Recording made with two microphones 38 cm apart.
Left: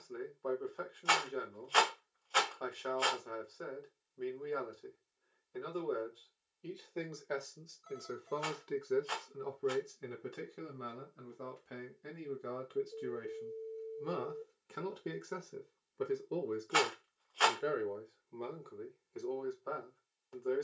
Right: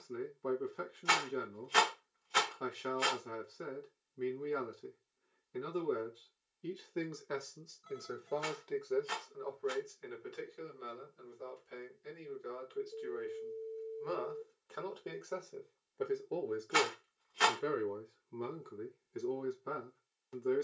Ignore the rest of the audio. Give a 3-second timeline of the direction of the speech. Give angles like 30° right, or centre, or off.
30° right, 30° right, 10° right, 60° left, 60° left, 10° left, 30° right.